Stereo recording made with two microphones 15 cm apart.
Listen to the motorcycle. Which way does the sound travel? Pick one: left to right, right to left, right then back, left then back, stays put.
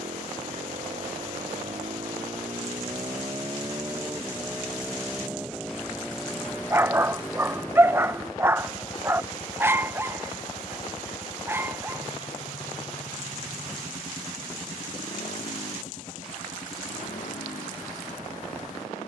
right to left.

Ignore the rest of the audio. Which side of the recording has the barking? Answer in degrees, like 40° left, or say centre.
20° right.